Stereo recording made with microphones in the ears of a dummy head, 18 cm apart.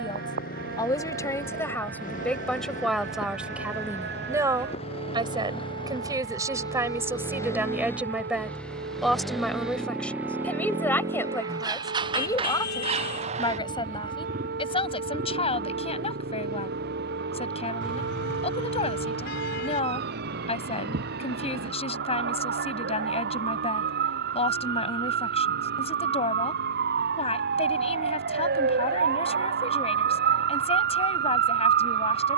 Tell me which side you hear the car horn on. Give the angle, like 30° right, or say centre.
50° left.